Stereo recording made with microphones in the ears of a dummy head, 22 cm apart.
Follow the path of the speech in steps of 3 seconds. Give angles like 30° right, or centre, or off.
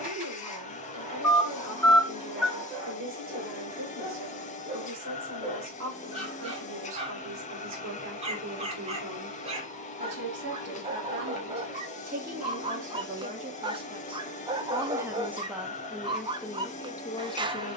60° right, 60° right, 60° right, 50° right, 30° right, 10° left.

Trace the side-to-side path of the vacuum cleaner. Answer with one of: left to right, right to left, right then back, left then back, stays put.
stays put.